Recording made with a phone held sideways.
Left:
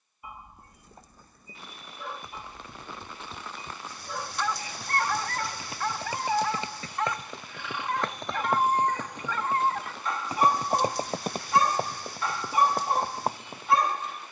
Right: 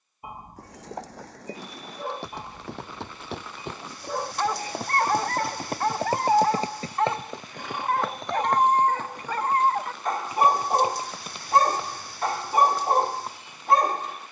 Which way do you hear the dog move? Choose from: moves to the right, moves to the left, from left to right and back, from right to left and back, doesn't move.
doesn't move.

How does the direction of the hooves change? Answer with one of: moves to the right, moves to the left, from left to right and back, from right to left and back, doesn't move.
moves to the left.